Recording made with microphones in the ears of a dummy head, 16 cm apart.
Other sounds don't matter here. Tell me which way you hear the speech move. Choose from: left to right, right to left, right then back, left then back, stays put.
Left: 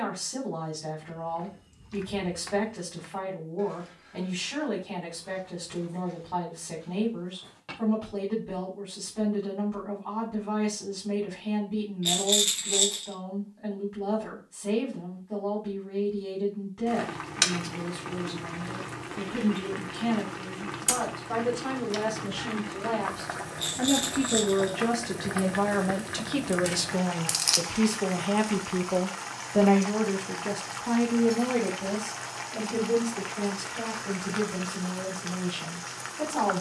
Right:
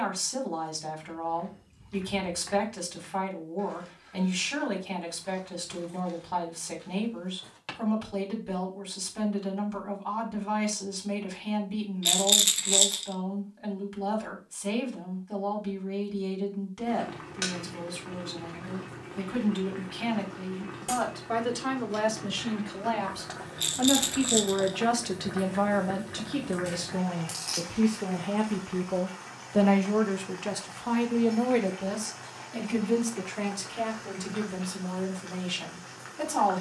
left then back.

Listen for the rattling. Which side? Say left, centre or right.
right.